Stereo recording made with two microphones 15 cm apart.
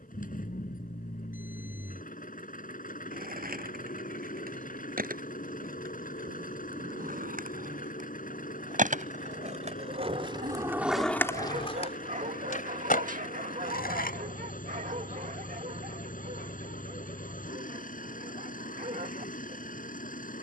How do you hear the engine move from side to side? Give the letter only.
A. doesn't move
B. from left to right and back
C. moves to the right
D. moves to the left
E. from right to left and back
A.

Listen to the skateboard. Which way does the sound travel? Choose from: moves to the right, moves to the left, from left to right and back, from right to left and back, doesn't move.
moves to the left.